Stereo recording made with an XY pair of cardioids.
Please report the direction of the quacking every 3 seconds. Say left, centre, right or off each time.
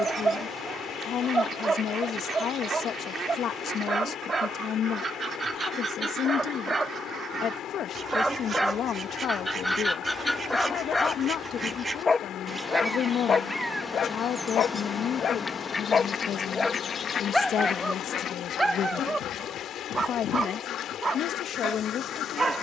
right, right, right, right, centre, left, left, left.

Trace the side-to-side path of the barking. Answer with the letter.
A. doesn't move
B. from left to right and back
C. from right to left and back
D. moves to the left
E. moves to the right
C.